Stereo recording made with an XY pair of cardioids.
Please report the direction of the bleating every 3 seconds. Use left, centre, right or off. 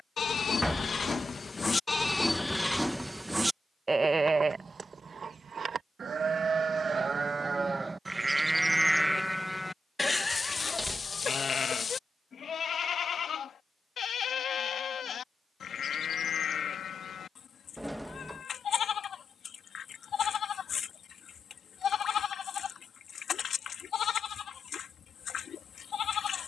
left, right, right, left, left, left, left, left, left.